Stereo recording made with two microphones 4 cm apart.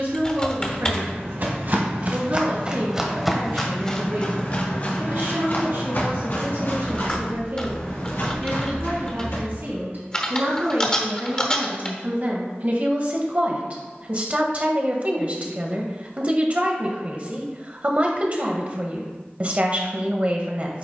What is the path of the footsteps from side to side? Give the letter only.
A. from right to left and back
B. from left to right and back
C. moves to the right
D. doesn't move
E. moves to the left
E.